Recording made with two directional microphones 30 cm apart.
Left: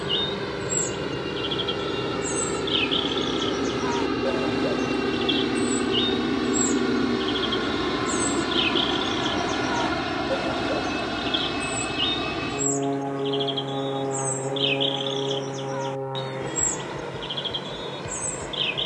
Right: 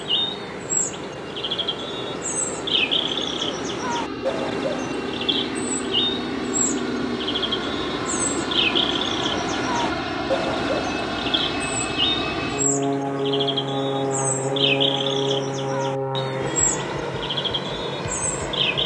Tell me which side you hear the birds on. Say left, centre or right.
right.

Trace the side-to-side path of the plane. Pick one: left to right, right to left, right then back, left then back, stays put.
left to right.